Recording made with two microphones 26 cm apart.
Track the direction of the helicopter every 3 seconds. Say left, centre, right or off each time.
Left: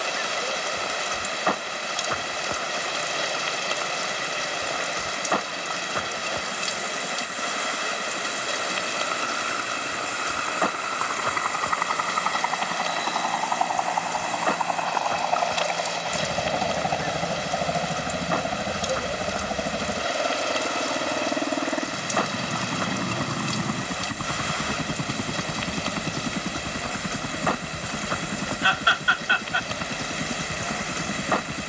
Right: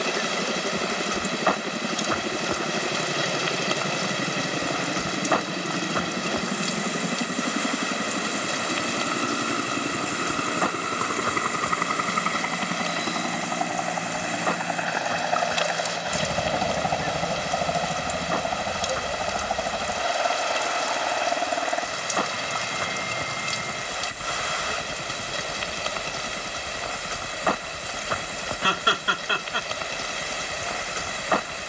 right, right, right, right, right, centre, left, left, left, left, left.